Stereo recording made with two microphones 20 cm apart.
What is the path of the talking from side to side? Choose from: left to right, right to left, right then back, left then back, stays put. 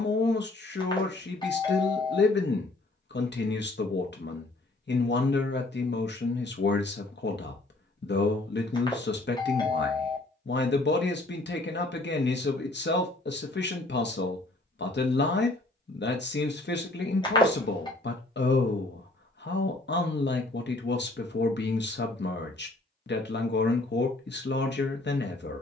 stays put.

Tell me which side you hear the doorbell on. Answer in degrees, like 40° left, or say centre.
20° left.